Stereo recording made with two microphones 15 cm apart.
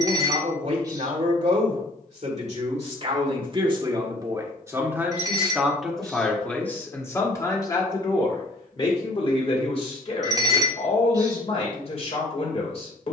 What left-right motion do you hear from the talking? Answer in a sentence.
You can hear the talking travel towards the left.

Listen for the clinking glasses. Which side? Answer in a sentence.
In this clip you hear the clinking glasses on the right.